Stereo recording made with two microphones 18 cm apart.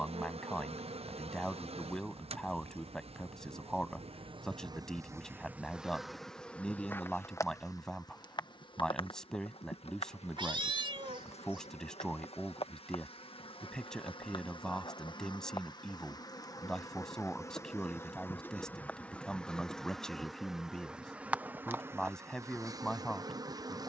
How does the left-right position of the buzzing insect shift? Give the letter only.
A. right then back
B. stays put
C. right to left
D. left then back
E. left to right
D.